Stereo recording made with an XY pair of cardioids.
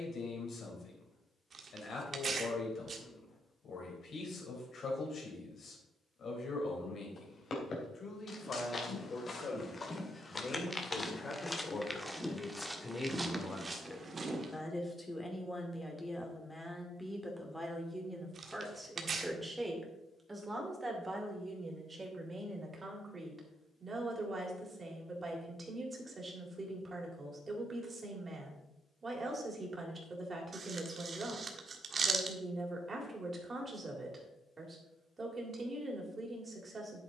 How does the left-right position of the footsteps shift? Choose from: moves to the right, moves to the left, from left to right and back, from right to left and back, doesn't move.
moves to the right.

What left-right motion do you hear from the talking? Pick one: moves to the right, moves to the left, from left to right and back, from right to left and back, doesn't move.
moves to the right.